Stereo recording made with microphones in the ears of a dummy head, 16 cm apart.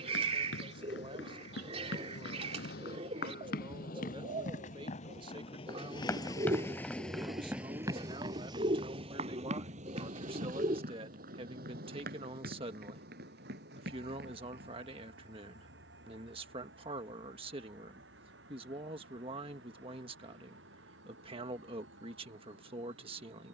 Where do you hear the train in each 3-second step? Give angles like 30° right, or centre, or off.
70° left, 50° left, centre, 50° right, 60° right, 70° right, 80° right, 80° right.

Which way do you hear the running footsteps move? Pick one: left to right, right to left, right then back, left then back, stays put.
left to right.